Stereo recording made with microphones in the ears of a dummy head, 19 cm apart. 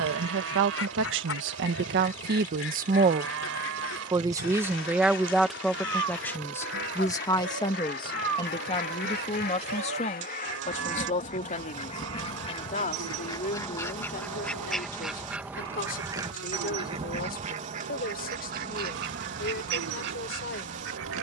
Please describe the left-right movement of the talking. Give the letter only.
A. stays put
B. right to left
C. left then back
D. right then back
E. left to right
B.